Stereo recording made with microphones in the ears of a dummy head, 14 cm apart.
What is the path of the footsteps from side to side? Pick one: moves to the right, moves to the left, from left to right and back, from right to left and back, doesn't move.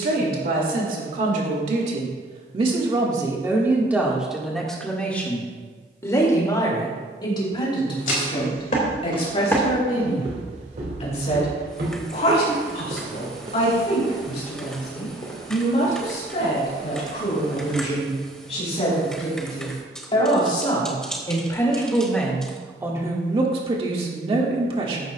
from left to right and back.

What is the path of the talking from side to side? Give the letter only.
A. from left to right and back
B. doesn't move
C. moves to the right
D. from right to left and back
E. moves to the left
D.